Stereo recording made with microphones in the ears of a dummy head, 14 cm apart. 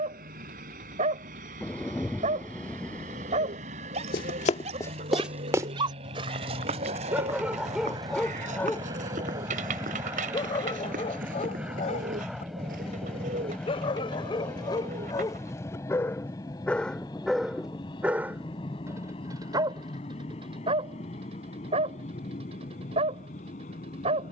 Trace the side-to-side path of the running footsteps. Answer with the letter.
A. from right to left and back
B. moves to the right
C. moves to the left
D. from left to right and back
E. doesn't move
B.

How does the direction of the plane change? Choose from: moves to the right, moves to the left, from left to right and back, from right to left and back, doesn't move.
moves to the left.